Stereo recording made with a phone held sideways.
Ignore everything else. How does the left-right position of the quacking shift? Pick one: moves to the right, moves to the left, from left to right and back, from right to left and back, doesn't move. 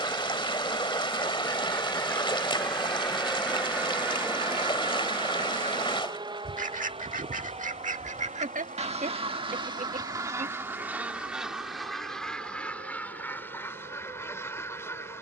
from left to right and back.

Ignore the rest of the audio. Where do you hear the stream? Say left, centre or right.
left.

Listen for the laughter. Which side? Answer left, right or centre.
right.